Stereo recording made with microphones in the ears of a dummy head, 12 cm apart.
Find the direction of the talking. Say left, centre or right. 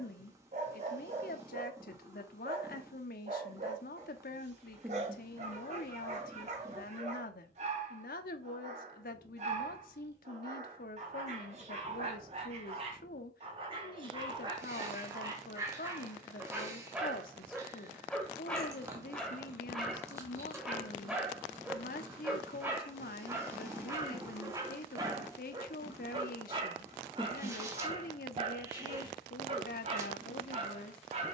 left.